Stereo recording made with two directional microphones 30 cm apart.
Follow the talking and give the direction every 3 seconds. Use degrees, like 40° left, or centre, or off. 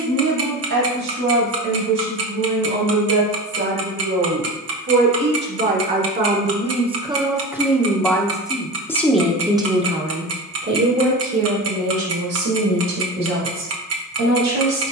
60° right, 40° right, 10° right, 30° right, 50° right.